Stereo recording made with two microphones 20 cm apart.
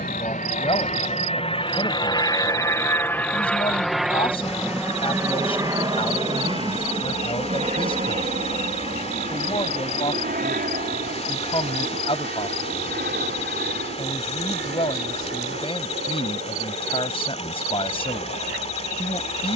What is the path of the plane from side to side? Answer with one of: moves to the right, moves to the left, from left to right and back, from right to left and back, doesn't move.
moves to the right.